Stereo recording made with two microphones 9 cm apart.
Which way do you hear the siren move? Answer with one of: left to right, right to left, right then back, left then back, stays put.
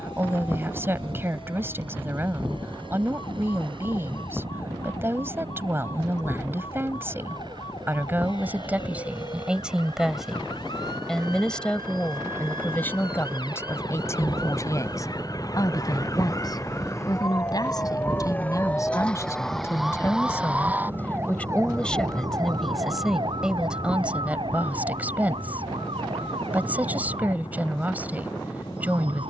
left to right.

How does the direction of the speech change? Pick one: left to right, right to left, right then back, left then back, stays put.
left then back.